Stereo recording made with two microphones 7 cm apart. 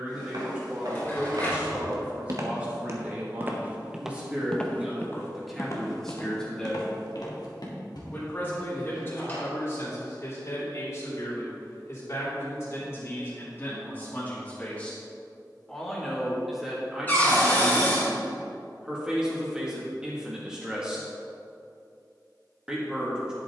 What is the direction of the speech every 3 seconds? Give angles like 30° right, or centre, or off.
20° right, 10° right, 20° left, 40° left, 30° left, 10° right, 10° right, 10° right.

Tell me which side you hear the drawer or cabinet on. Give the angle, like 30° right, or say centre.
20° left.